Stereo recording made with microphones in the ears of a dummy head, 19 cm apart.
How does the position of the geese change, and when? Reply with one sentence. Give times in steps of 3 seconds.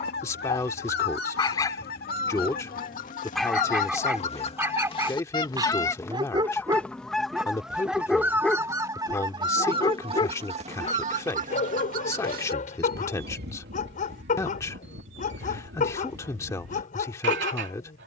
You can hear the geese on the left from 0 s, in the centre from 6 s and on the right from 9 s.